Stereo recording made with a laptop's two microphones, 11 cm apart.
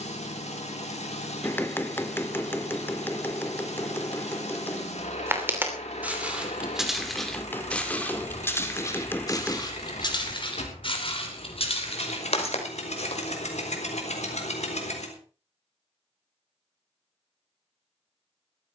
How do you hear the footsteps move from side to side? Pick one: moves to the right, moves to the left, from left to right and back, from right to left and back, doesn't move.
moves to the left.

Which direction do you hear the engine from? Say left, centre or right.
left.